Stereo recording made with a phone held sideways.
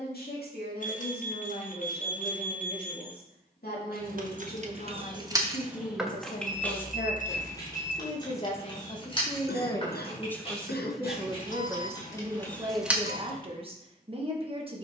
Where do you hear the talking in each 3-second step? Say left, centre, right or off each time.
left, left, left, centre, right.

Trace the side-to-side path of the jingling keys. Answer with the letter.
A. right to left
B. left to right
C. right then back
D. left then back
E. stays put
D.